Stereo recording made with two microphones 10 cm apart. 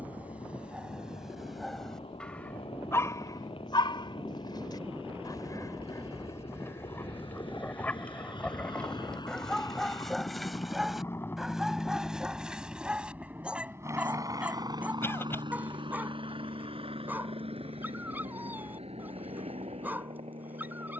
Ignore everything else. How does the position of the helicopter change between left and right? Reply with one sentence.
In this clip you hear the helicopter move to the right.